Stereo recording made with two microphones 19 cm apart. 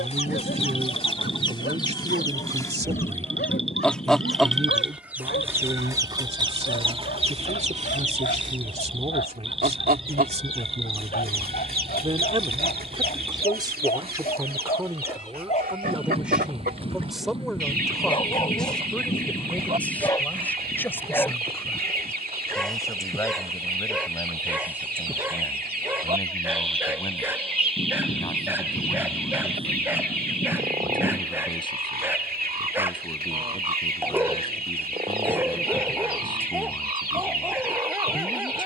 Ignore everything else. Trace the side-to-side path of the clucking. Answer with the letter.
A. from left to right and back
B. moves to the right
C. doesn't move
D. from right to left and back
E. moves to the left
B.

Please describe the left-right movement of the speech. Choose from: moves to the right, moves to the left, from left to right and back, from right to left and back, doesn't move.
moves to the left.